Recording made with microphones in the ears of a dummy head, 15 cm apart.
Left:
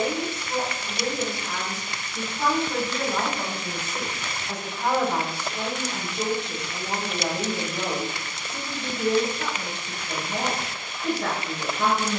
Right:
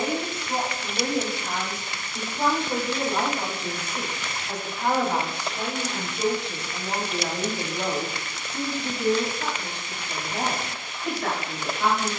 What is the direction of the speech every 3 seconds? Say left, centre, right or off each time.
right, centre, left, left.